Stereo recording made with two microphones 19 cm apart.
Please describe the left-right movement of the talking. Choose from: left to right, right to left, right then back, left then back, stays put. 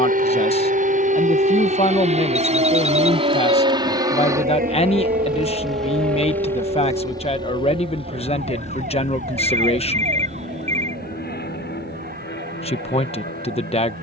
stays put.